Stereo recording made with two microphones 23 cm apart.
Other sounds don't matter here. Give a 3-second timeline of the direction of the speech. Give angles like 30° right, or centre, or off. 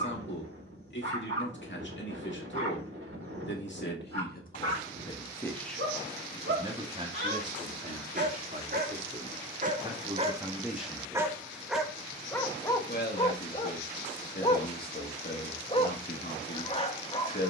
50° left, 30° left, 30° right, 10° right, 40° left, 40° left.